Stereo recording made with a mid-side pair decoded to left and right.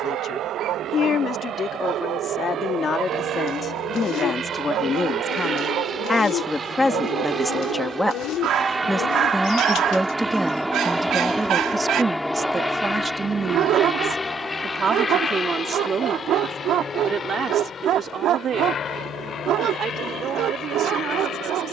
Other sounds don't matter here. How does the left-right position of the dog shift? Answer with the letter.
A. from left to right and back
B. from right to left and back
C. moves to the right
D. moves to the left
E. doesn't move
E.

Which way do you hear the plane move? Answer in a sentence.
In this clip you hear the plane travel towards the left.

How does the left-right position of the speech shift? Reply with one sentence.
In this clip you hear the speech move to the right.